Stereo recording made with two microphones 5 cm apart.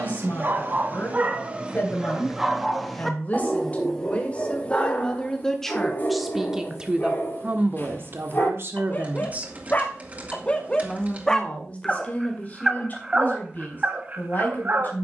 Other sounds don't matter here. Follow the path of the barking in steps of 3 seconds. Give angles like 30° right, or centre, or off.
30° right, 20° left, 40° left, 20° left, 30° right.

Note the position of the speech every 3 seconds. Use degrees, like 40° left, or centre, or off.
40° left, 20° left, 30° right, centre, 40° left.